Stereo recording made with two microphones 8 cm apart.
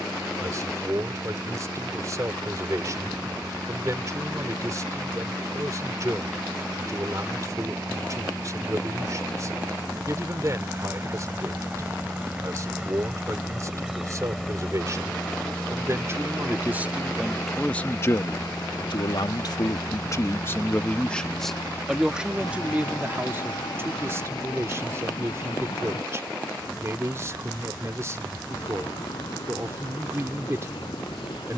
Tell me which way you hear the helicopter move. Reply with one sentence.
In this clip you hear the helicopter go from the right side to the left.